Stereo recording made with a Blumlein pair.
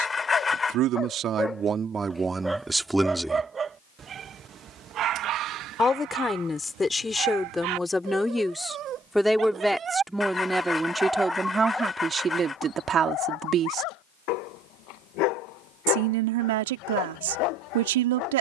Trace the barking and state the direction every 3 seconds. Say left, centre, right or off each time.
centre, right, right, centre, left, left.